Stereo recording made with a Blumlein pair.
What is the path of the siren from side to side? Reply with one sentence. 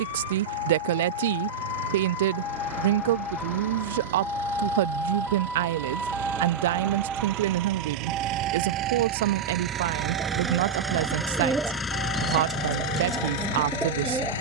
In this clip you hear the siren go from the left side to the right.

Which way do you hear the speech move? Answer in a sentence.
In this clip you hear the speech stay in one place.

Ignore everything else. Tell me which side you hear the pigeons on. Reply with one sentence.
You can hear the pigeons in the centre.